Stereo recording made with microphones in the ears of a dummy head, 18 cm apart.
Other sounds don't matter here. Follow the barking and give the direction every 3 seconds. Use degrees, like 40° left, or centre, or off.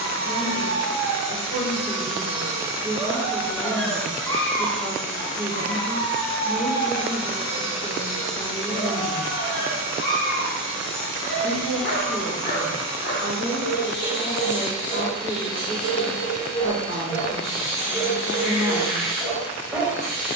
20° right, 10° left, 30° left, 50° left, 60° left, 40° left, 10° left.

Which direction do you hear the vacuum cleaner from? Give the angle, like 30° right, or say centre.
80° left.